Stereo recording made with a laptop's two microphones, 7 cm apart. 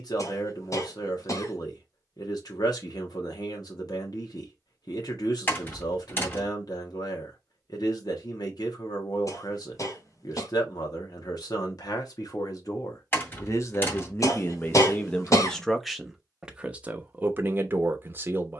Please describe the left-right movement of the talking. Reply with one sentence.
You can hear the talking move to the right.